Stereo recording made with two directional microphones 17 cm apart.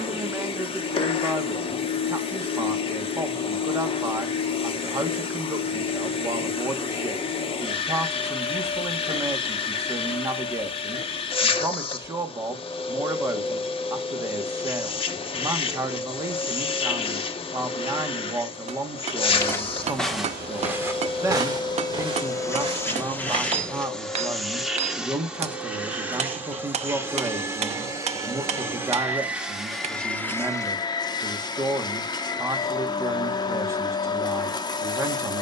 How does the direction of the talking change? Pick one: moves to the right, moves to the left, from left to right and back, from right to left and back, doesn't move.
doesn't move.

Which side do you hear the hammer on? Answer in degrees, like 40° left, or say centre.
40° right.